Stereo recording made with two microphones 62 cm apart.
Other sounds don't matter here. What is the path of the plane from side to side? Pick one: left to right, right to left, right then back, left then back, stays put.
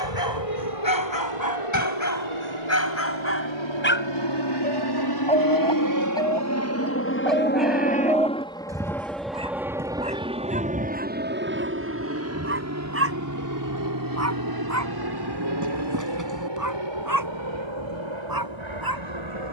left to right.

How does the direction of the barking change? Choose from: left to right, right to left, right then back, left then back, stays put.
left to right.